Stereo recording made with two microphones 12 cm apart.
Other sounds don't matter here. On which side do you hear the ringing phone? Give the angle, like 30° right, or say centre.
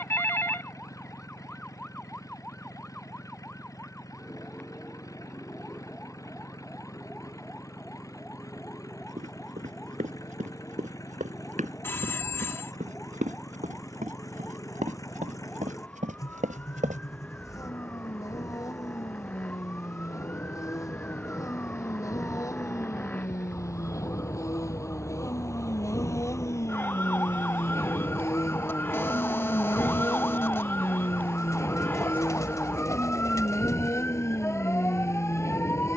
20° left.